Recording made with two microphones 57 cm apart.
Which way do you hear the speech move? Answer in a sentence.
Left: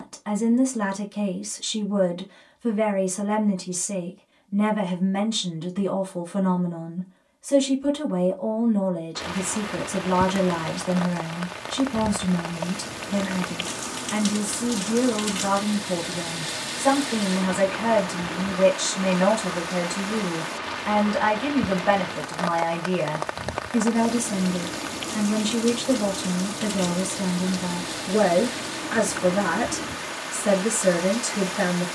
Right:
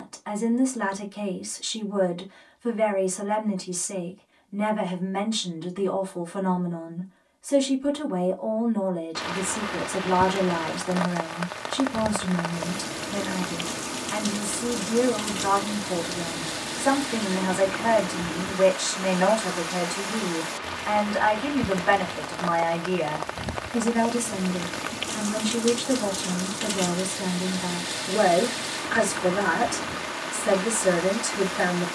You can hear the speech stay put.